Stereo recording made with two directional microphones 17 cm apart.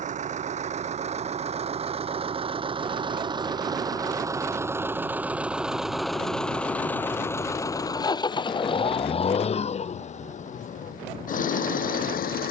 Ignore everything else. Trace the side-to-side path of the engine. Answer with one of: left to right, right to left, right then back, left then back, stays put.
right to left.